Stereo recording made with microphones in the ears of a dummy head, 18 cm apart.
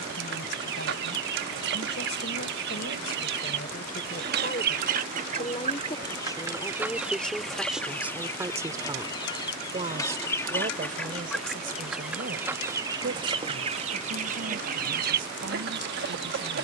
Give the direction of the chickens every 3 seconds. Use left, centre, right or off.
right, right, centre, centre, right, right.